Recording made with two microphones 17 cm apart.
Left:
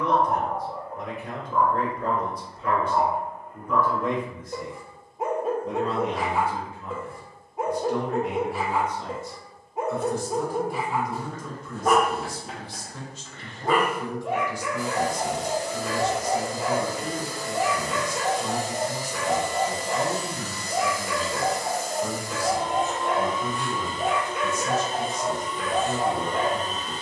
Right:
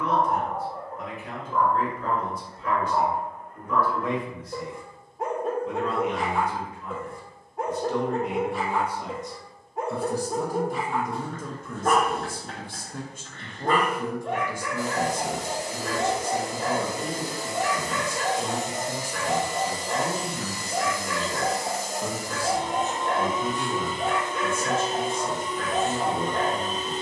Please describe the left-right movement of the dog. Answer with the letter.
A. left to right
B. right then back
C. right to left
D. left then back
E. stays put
E.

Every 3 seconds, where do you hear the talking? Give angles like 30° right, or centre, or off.
50° left, 40° left, 10° left, 40° right, 50° right, 50° right, 50° right, 50° right, 50° right.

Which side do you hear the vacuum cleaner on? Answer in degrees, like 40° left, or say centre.
60° right.